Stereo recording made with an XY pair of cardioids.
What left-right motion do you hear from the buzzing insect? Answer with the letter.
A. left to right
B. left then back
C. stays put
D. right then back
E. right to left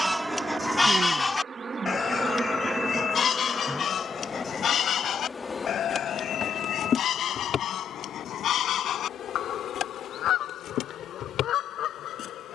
E.